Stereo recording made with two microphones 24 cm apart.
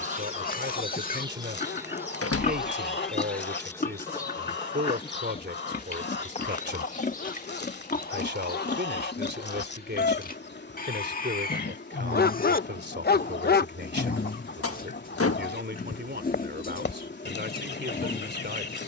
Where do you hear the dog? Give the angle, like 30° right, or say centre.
40° left.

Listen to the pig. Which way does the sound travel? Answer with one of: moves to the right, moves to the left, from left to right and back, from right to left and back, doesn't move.
doesn't move.